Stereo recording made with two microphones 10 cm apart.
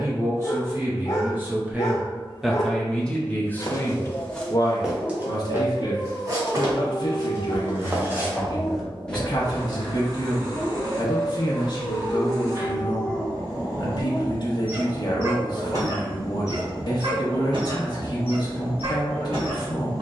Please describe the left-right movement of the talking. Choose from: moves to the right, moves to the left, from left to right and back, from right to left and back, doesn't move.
moves to the left.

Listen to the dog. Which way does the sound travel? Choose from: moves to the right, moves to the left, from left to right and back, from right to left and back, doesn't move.
moves to the right.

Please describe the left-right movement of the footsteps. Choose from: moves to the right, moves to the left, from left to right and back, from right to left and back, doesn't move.
from left to right and back.